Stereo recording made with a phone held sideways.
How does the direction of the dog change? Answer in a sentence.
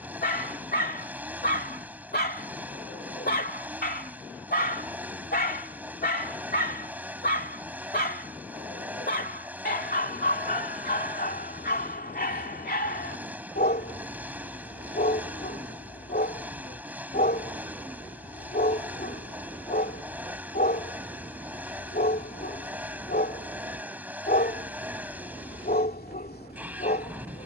You can hear the dog stay put.